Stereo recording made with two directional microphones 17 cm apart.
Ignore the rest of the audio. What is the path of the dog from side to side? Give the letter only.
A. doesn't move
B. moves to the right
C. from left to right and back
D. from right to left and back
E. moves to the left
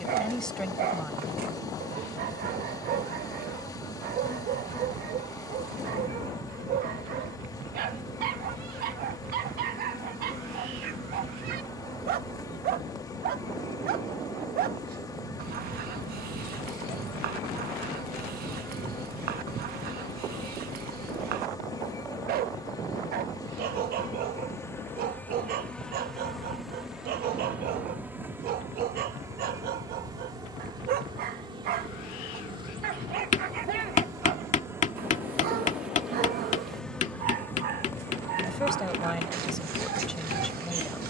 A.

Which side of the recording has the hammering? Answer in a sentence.
You can hear the hammering on the left.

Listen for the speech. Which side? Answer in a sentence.
You can hear the speech in the centre.